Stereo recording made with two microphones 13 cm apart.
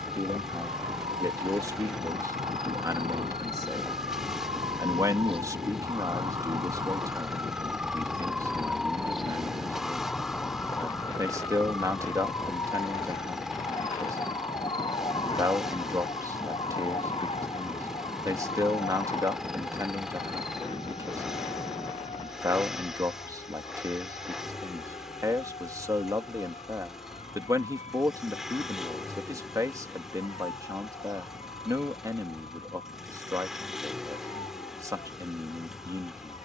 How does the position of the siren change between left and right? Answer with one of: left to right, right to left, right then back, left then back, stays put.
right to left.